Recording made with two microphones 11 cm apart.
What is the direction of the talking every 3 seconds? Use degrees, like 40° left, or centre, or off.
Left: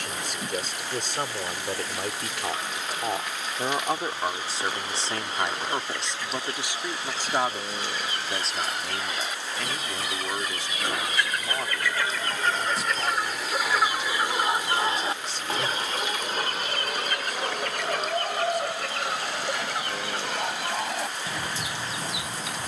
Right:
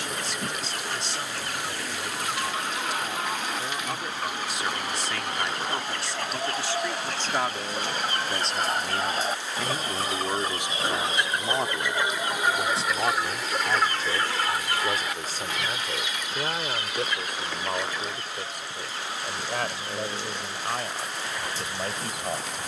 50° left, 30° left, 10° left, 20° right, 30° right, 50° right, 50° right, 60° right.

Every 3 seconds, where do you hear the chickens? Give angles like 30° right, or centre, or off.
60° right, 60° right, 50° right, 30° right, centre, 50° left, 70° left, 80° left.